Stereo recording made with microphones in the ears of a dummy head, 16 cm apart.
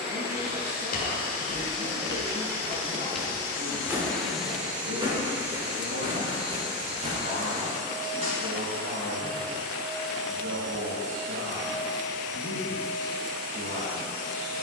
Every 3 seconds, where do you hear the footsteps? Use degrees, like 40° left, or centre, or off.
40° left, 20° right, 40° right, off, off.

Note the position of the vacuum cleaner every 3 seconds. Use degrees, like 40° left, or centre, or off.
50° left, centre, 40° right, 60° right, 60° right.